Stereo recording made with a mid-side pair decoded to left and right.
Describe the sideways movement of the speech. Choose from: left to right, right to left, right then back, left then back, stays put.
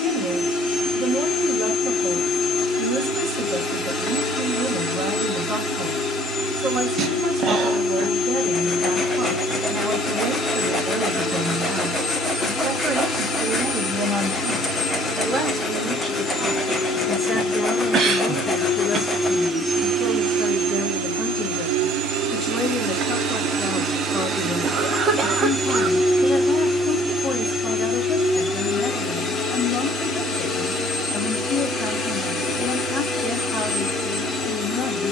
right to left.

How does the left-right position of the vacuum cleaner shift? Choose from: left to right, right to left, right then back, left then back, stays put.
right then back.